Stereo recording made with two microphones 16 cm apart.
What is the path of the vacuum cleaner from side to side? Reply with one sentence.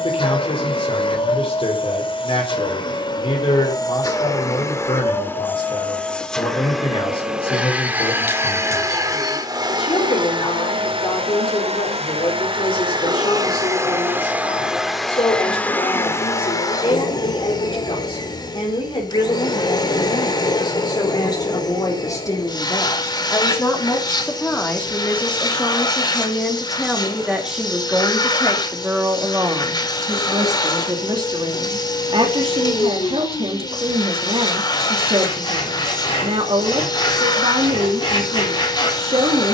You can hear the vacuum cleaner move from left to right and back again.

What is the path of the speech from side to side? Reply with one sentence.
In this clip you hear the speech move from left to right.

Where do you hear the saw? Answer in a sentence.
In this clip you hear the saw on the left.